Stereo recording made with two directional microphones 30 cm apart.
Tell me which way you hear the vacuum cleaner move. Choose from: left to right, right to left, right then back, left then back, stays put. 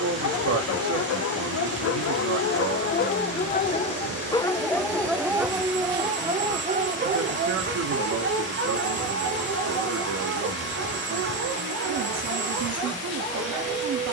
stays put.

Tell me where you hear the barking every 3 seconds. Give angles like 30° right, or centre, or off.
50° left, 10° left, 30° right, 50° right, 60° right.